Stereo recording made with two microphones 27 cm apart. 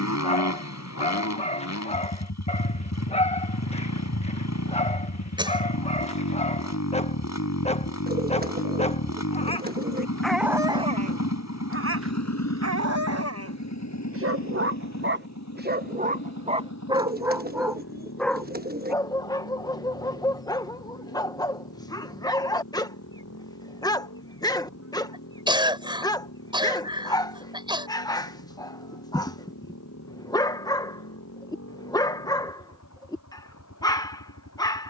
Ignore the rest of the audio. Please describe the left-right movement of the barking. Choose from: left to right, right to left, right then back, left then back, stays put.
right then back.